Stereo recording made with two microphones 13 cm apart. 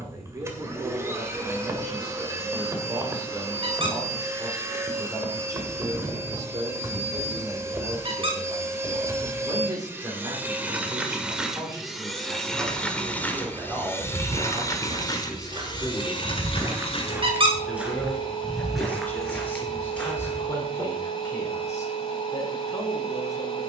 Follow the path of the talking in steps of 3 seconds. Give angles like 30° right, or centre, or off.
30° right, 30° right, 30° right, 30° right, 20° right, centre, 10° left, 20° left.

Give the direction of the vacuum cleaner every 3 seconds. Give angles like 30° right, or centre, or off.
20° right, 20° right, 20° right, 10° right, 10° left, 40° left, 40° left, 40° left.